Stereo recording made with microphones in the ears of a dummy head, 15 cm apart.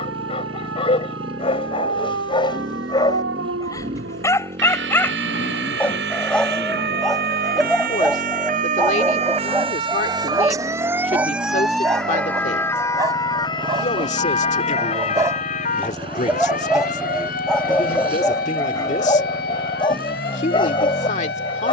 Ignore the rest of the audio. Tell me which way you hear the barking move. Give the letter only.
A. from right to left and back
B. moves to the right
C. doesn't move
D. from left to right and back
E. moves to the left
D.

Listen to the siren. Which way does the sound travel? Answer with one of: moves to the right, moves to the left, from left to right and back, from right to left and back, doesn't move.
moves to the left.